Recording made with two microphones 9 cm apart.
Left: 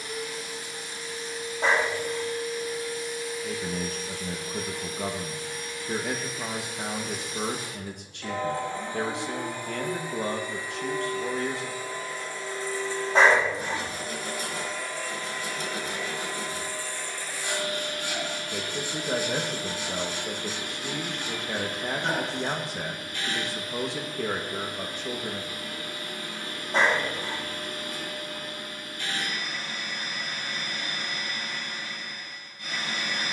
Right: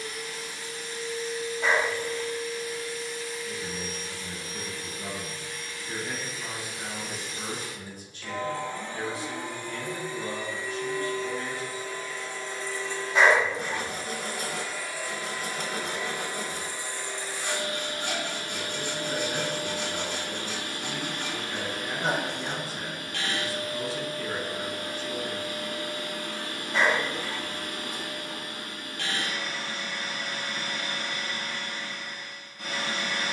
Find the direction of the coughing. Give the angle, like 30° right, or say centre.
30° left.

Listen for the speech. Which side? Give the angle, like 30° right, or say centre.
70° left.